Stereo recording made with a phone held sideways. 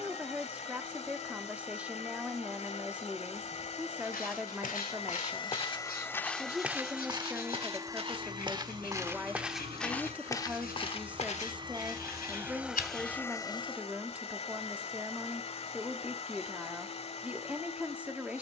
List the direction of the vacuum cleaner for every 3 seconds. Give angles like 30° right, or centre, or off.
50° left, 40° left, 20° right, 40° right, 20° left, 40° left.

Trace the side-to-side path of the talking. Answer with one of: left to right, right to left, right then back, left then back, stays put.
stays put.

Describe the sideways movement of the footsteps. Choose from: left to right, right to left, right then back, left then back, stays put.
right then back.